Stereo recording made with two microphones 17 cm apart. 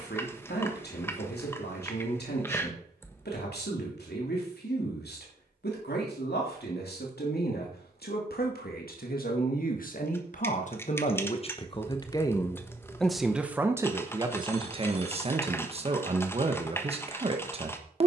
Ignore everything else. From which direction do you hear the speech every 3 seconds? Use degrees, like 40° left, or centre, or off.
80° left, 80° left, 70° left, 50° left, 10° right, 40° right.